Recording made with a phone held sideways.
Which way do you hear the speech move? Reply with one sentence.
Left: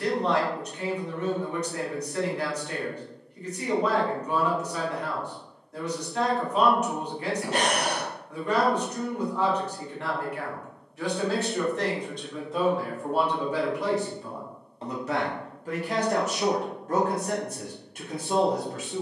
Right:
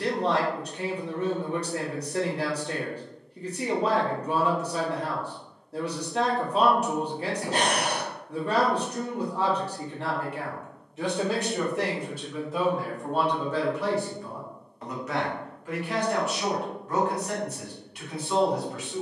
In this clip you hear the speech move to the left.